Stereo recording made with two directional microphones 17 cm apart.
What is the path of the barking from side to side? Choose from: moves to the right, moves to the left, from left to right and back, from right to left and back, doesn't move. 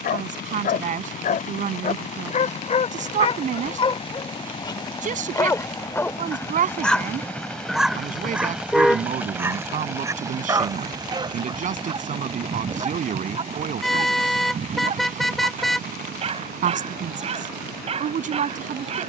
moves to the right.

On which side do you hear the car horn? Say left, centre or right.
centre.